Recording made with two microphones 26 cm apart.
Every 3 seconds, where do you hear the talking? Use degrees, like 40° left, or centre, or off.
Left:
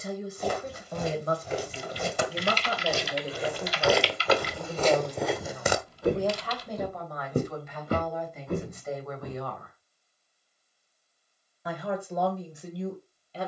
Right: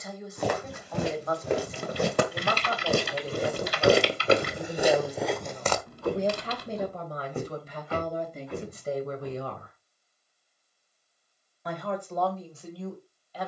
30° left, centre, 30° right, 20° right, 20° left.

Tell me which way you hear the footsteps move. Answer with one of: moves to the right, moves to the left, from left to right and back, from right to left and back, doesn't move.
moves to the left.